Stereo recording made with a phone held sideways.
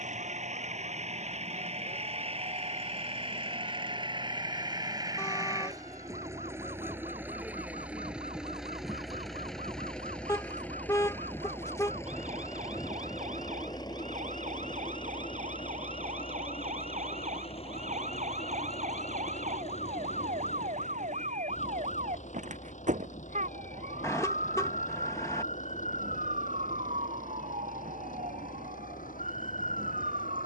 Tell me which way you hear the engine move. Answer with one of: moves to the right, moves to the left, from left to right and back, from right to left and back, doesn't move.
moves to the left.